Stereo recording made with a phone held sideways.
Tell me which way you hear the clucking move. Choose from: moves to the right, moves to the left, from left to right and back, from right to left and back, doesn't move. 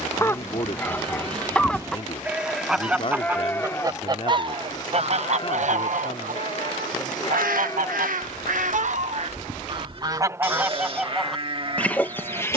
from left to right and back.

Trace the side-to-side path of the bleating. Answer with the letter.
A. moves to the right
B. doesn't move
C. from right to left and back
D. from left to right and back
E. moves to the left
C.